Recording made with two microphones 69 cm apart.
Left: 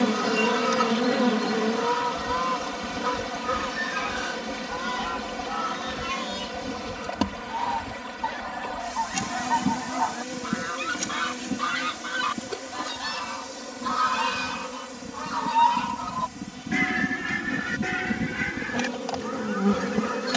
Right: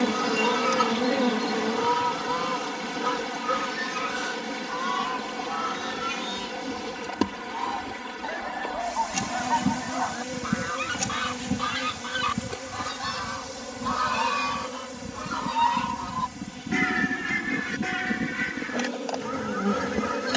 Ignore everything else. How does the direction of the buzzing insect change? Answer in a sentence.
In this clip you hear the buzzing insect move from left to right and back again.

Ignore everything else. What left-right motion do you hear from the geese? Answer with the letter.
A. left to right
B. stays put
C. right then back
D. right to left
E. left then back
E.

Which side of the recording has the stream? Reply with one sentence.
You can hear the stream in the centre.